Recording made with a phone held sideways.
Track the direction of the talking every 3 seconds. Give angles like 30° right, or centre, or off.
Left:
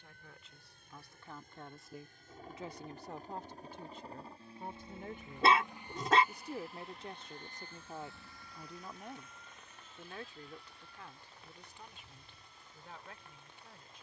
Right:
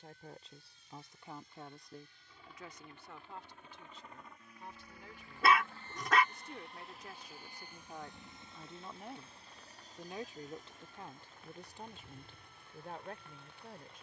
10° right, 50° left, 20° left, 30° right, 50° right.